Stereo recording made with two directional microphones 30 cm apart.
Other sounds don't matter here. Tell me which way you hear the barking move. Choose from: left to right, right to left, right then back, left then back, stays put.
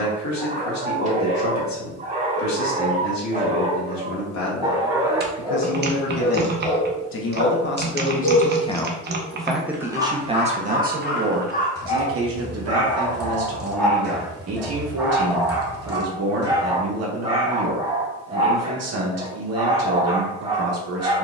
left then back.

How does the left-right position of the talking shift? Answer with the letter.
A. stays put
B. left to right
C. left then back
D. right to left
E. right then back
B.